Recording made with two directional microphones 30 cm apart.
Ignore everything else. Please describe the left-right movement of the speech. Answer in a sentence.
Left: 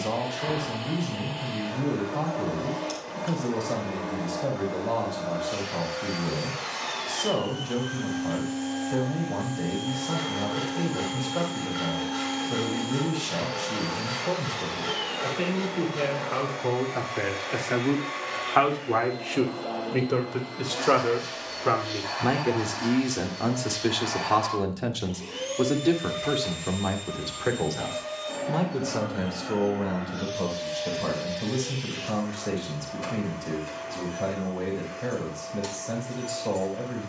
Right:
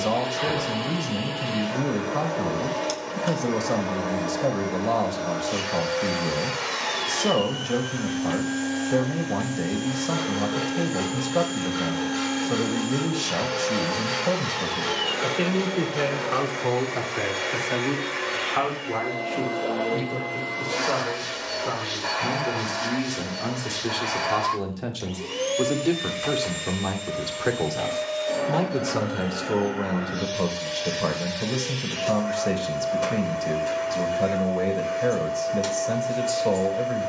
In this clip you hear the speech move from right to left and back again.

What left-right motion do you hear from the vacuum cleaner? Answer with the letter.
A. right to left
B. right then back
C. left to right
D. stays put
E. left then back
D.